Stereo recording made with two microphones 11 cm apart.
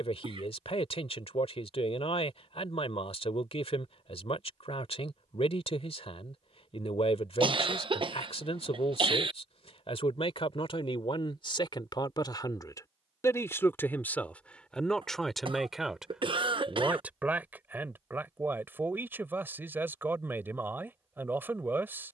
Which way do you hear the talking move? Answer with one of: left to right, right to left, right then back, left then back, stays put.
left to right.